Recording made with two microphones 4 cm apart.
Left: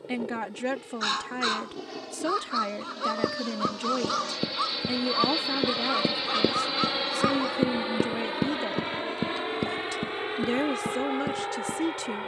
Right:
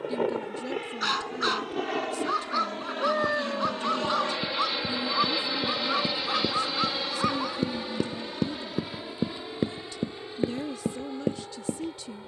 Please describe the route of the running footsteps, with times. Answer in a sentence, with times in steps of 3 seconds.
You can hear the running footsteps not at all from 0 s, on the left from 3 s and on the right from 9 s.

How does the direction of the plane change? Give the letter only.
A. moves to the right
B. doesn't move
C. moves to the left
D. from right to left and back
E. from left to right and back
C.